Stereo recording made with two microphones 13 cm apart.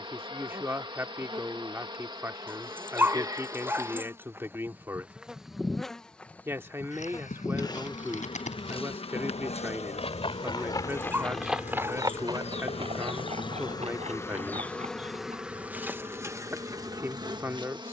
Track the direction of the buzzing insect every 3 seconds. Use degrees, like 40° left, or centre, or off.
40° right, 20° right, 30° left, 60° left, 40° left, 20° right.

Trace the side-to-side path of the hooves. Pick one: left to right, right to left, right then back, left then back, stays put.
left to right.